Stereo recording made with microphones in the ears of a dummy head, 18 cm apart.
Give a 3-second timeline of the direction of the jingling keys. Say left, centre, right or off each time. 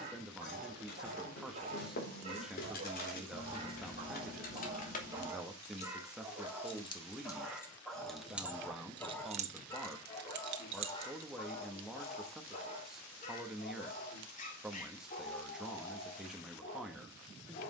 left, left, centre, right, off, off.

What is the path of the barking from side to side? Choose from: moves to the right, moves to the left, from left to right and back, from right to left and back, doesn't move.
moves to the left.